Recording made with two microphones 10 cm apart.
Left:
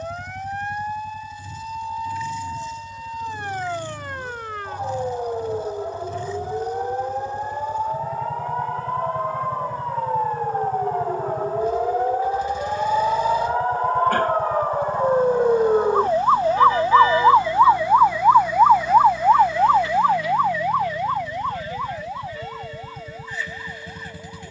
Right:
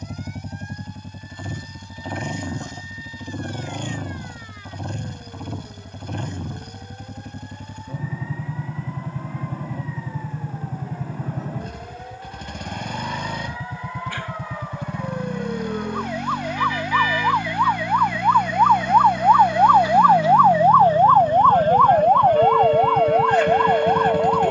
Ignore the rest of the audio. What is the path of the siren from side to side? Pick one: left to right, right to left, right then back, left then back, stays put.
left to right.